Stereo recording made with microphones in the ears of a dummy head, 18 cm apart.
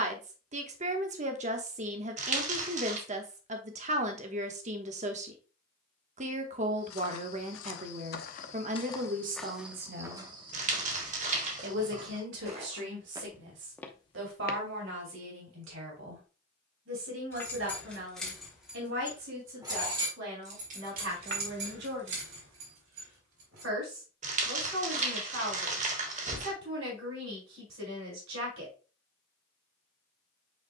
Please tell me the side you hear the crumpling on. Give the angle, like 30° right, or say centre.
40° right.